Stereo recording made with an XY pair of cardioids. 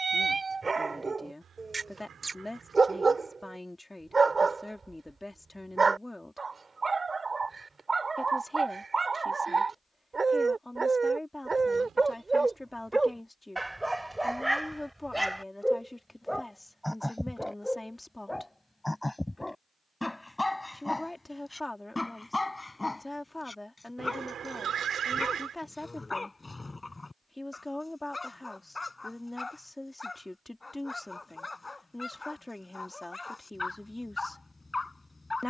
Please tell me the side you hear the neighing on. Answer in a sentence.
In this clip you hear the neighing on the right.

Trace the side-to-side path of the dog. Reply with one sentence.
You can hear the dog move to the left.